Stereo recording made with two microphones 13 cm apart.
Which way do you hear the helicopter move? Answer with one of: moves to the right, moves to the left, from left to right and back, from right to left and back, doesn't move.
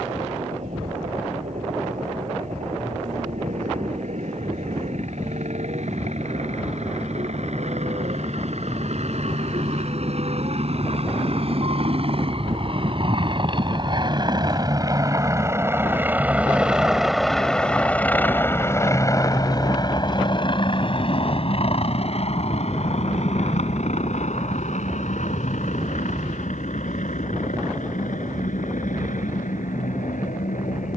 moves to the left.